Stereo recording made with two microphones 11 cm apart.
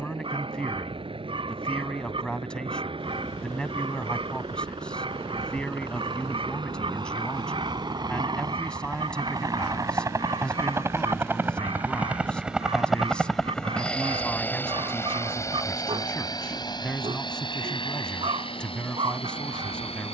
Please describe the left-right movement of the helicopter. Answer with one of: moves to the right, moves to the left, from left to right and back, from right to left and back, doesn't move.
moves to the left.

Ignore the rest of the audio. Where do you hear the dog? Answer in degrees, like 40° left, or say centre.
60° right.